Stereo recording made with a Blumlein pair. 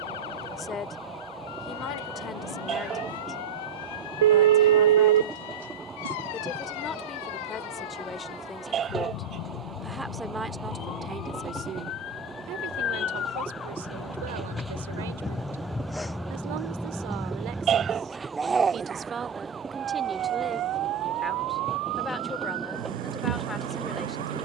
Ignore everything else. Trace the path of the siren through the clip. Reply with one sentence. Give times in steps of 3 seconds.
You can hear the siren on the left from 0 s, in the centre from 15 s and on the right from 18 s.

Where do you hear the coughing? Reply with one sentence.
You can hear the coughing on the right.